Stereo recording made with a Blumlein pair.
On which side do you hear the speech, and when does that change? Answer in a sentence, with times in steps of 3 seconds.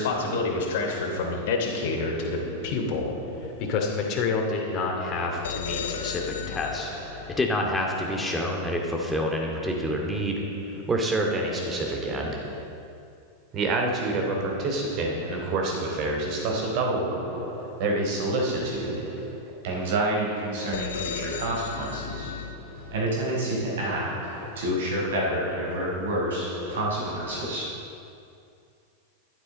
In this clip you hear the speech on the left from 0 s, in the centre from 6 s and on the right from 12 s.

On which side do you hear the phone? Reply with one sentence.
You can hear the phone on the left.